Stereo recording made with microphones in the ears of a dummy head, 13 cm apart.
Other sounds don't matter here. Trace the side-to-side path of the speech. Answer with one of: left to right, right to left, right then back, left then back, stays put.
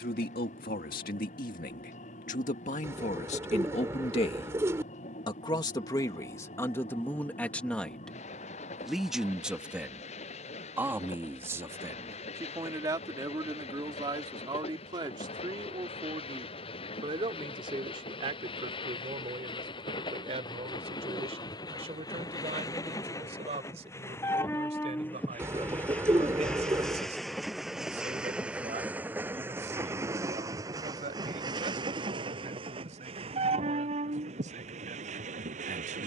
left to right.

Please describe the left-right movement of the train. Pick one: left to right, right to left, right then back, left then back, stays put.
left to right.